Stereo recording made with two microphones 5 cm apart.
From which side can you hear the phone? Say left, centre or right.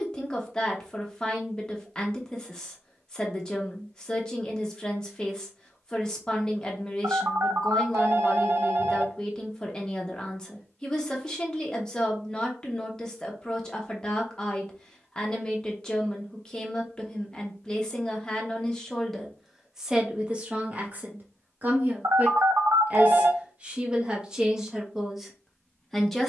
right.